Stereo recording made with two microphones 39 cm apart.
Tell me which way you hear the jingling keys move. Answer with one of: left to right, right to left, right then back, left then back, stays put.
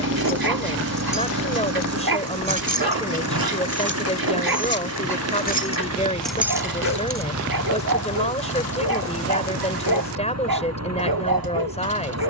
left to right.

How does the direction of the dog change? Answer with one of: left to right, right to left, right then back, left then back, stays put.
stays put.